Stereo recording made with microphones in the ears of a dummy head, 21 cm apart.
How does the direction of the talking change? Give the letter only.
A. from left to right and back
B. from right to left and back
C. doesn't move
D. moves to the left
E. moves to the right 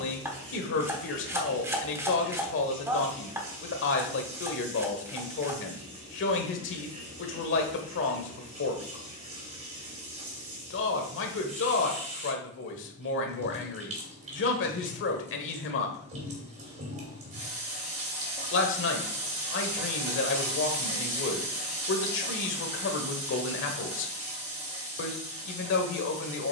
C.